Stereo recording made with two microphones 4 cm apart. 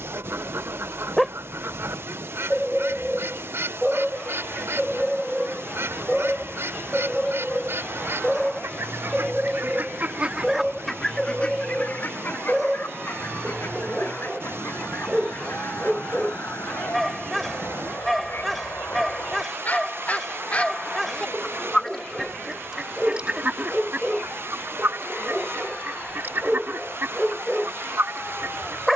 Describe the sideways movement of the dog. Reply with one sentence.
In this clip you hear the dog stay put.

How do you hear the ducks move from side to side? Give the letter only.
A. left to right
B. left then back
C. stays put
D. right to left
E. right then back
B.